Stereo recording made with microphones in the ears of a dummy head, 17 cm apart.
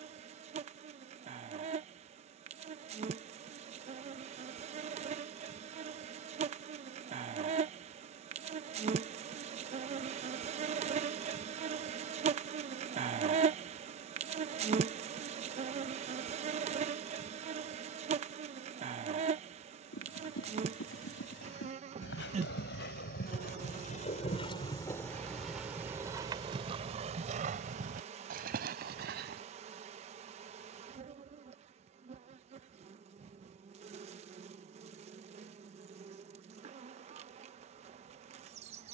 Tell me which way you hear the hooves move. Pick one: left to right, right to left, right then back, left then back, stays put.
left to right.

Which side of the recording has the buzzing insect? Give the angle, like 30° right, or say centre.
40° right.